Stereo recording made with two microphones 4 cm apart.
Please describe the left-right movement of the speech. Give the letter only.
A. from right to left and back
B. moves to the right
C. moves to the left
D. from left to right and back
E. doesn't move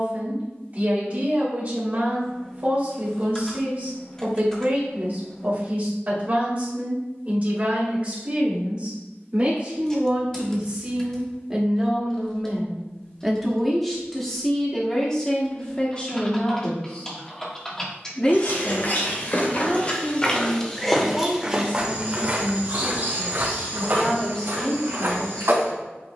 C.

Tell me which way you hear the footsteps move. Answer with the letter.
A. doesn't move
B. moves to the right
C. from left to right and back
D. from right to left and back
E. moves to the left
B.